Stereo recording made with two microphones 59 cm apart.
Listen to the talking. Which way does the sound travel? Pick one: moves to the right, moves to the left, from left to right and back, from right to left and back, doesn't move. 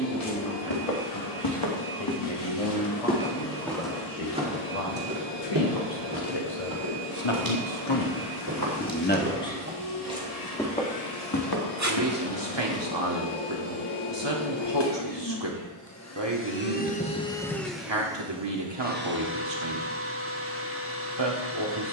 moves to the right.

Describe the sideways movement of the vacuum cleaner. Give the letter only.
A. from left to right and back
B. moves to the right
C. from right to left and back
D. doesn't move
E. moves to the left
B.